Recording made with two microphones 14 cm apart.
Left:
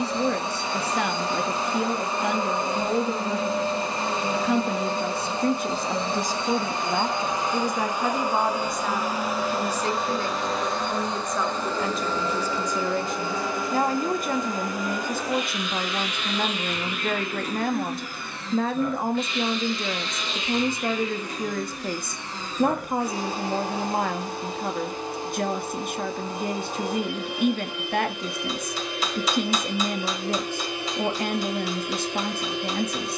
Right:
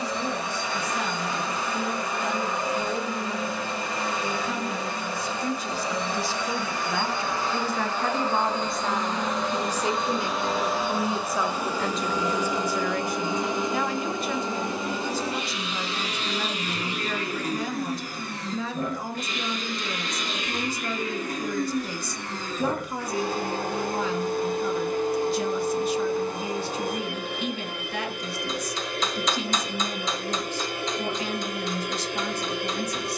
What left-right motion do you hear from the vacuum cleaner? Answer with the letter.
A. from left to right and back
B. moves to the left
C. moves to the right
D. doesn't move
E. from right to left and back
C.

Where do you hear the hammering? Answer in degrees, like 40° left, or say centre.
10° left.